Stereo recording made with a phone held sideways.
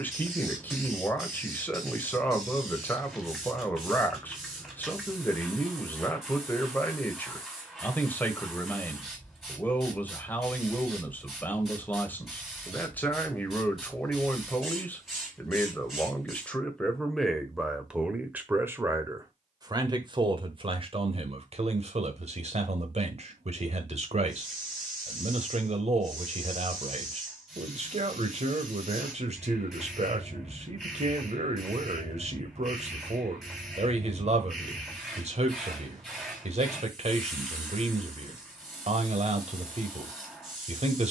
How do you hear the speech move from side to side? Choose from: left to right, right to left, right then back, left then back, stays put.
left to right.